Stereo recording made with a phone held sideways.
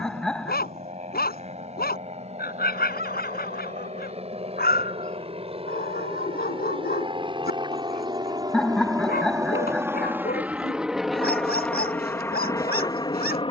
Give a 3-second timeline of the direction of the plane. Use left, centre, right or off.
right, right, right, centre, left.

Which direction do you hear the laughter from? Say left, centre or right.
centre.